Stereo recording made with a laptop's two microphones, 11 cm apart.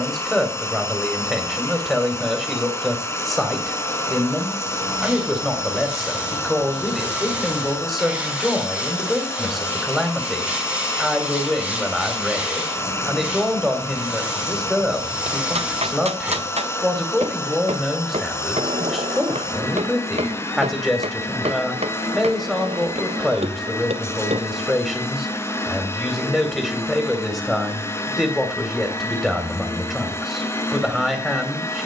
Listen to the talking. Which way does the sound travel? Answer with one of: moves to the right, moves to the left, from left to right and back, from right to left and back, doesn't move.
doesn't move.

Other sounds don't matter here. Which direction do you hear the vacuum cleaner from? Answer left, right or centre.
left.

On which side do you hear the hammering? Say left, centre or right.
right.